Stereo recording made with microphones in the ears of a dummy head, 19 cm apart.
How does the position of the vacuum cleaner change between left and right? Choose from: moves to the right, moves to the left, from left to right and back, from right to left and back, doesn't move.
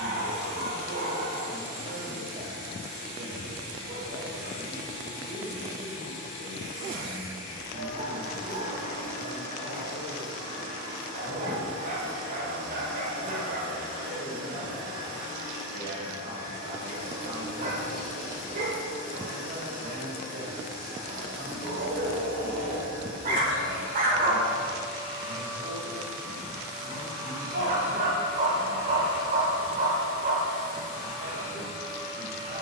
doesn't move.